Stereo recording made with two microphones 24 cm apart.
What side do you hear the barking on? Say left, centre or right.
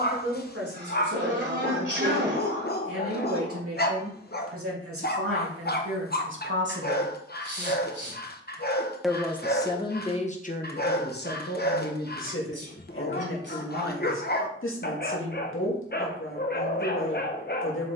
left.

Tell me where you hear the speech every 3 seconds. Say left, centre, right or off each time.
right, right, right, left, left, left.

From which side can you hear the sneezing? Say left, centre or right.
right.